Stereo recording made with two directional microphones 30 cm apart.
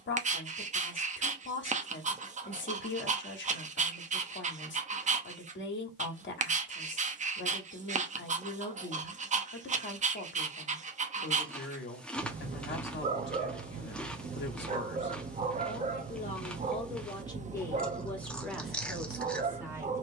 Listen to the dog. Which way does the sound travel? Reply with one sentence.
You can hear the dog stay put.